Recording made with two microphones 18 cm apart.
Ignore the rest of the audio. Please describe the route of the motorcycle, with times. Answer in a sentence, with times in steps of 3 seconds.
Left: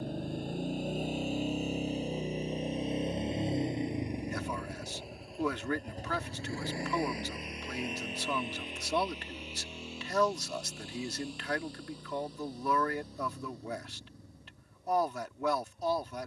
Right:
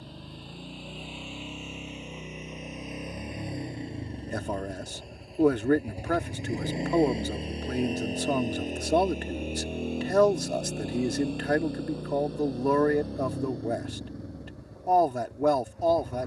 You can hear the motorcycle on the left from 0 s, in the centre from 3 s and on the right from 6 s.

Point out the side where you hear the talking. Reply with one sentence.
You can hear the talking on the right.